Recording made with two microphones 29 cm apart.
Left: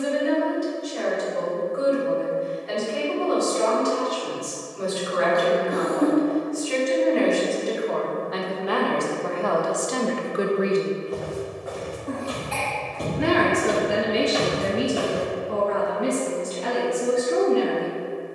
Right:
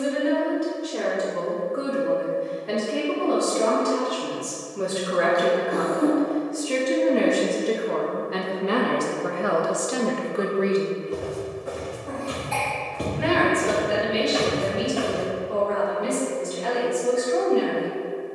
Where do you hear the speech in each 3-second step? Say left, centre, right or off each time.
right, right, right, centre, left, left.